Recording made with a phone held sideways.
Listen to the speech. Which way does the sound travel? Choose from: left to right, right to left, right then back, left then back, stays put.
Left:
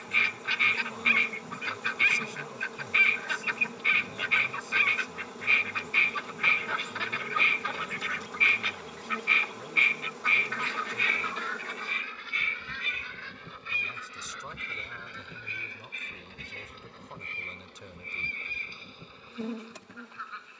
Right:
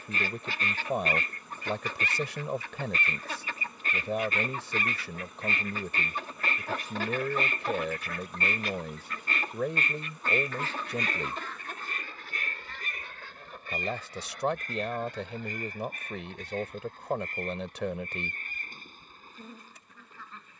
stays put.